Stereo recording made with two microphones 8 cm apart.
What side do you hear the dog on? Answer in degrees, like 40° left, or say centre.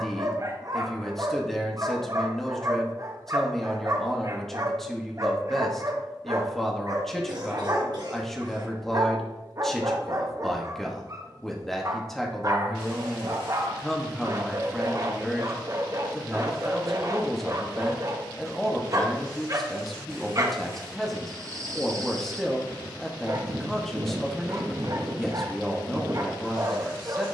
40° right.